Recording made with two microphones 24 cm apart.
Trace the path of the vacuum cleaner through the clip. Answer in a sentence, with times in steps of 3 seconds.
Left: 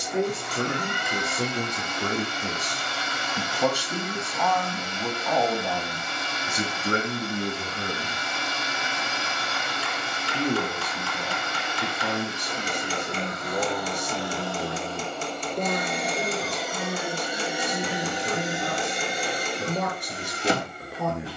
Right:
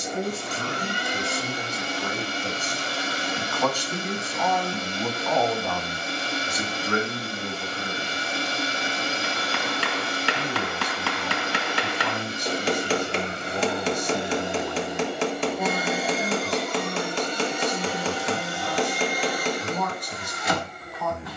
In this clip you hear the vacuum cleaner on the right from 0 s, in the centre from 15 s and on the left from 18 s.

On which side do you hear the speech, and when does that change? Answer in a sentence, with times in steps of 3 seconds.
You can hear the speech on the left from 0 s, in the centre from 3 s and on the left from 6 s.